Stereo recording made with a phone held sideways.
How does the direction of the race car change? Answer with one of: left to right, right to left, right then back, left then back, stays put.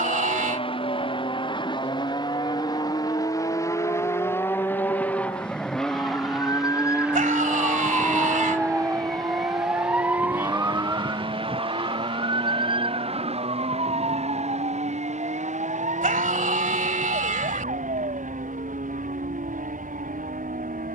left to right.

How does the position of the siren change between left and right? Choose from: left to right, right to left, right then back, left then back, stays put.
left to right.